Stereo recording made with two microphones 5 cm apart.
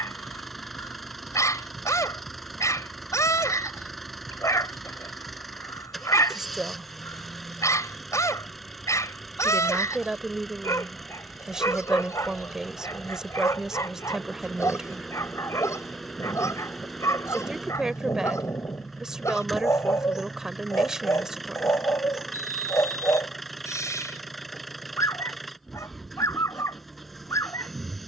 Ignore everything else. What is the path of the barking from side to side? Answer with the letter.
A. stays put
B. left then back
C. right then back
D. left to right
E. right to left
A.